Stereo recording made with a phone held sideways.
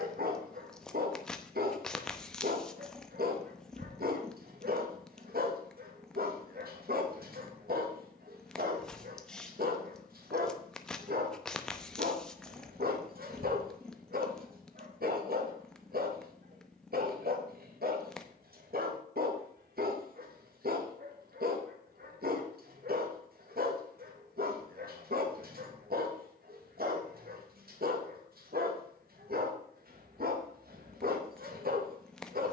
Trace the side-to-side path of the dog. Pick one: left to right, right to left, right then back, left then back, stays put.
stays put.